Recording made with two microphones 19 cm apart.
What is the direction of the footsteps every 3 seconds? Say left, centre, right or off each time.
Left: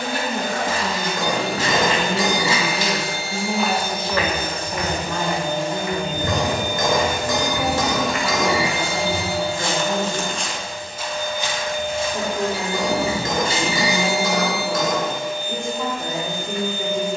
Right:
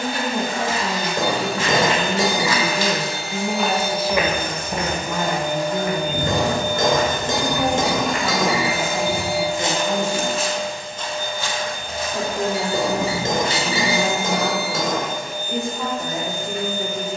left, right, right, centre, left, off.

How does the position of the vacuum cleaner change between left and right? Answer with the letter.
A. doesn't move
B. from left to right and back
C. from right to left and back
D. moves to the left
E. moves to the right
E.